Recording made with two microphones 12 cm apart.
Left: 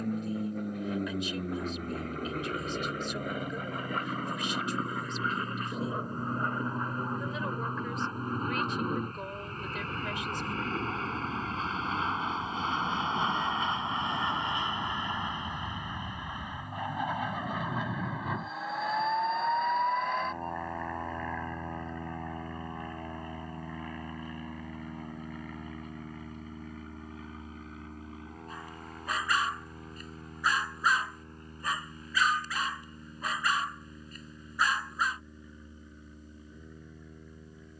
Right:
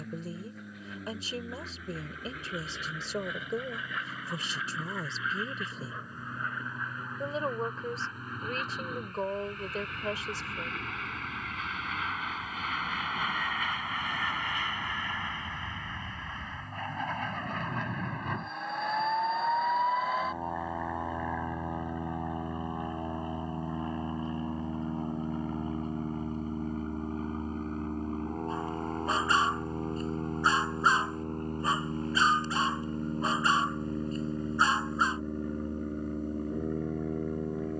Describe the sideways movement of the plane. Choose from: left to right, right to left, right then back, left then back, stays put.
left to right.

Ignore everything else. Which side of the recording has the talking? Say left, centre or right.
right.